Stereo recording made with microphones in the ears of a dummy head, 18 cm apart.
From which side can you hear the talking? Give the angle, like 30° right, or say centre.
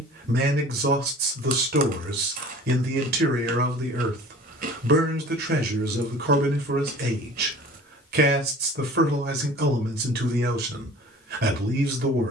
50° right.